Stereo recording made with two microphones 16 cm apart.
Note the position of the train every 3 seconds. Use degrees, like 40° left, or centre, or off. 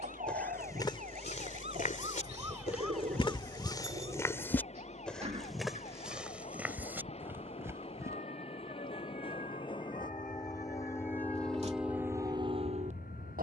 50° left, 50° left, 40° left, 20° left, 40° right.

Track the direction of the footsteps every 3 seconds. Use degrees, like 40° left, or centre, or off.
40° left, 20° left, 10° right, off, off.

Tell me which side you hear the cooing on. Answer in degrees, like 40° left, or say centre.
50° right.